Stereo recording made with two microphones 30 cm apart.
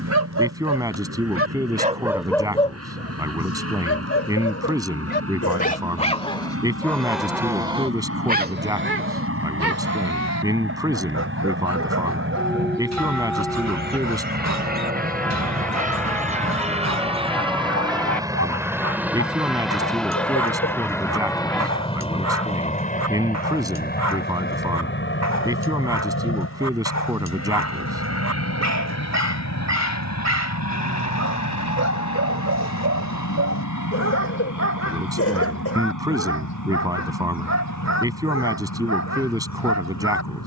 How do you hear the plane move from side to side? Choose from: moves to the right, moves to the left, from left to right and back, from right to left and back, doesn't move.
moves to the left.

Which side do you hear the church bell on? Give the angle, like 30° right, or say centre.
centre.